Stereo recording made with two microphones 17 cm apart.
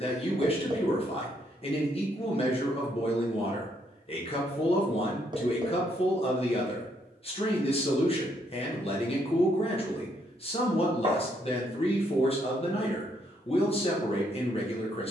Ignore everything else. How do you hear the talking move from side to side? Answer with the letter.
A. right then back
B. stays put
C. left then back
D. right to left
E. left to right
B.